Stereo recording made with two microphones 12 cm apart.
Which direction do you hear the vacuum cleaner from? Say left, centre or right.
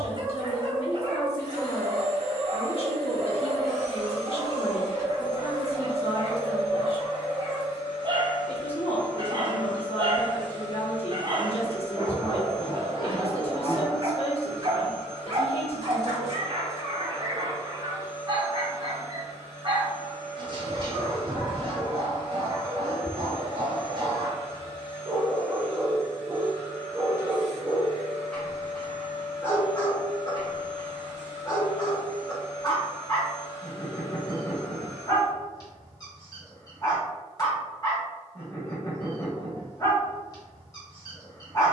left.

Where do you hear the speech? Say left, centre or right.
left.